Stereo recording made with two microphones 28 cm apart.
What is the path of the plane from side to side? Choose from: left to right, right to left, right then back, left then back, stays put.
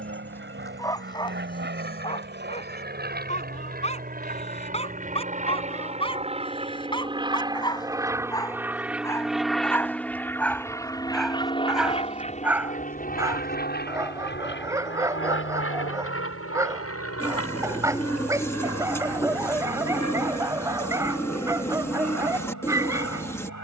right to left.